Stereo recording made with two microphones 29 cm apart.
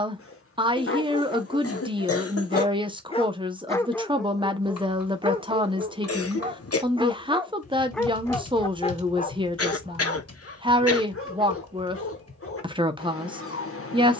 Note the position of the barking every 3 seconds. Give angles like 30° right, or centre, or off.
40° left, 10° right, centre, 40° left, 50° left.